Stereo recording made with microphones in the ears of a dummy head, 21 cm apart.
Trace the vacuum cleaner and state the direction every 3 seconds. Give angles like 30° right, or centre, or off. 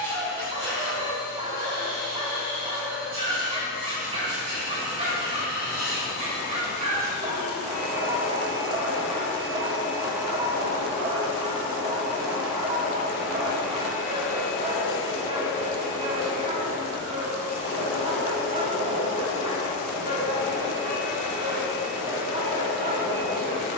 50° right, 50° right, 30° right, 20° right, 10° left, 30° left, 40° left, 50° left.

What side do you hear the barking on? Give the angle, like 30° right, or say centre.
30° right.